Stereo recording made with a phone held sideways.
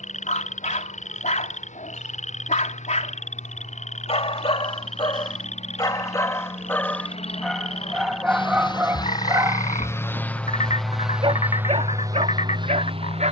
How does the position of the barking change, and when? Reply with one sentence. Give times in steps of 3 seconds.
You can hear the barking on the left from 0 s, in the centre from 6 s and on the right from 9 s.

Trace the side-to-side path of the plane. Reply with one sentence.
You can hear the plane move to the right.